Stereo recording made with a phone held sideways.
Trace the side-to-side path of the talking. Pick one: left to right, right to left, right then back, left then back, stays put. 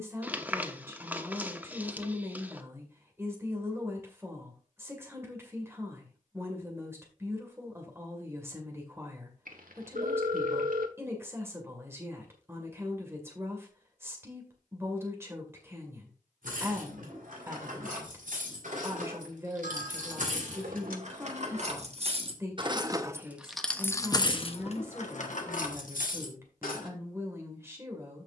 stays put.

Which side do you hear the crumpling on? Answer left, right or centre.
centre.